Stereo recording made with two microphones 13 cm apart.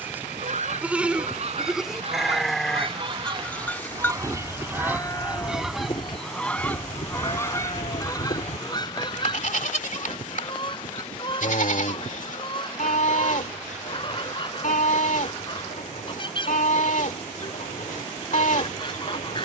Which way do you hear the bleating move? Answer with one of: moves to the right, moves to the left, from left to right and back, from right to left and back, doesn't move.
moves to the left.